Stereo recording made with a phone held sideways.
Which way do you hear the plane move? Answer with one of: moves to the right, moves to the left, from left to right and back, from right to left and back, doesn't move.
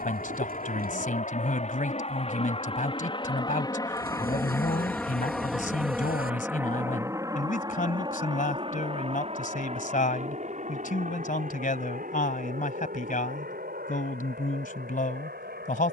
moves to the right.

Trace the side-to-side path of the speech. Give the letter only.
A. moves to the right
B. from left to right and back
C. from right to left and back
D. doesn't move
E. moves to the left
D.